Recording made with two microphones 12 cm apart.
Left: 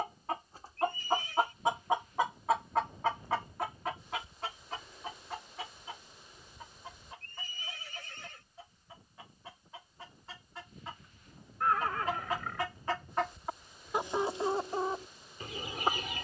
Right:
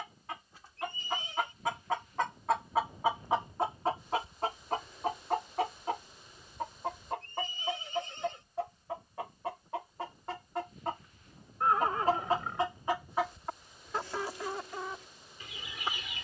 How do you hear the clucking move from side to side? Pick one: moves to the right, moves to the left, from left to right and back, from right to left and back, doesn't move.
from left to right and back.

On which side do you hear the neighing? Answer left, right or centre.
right.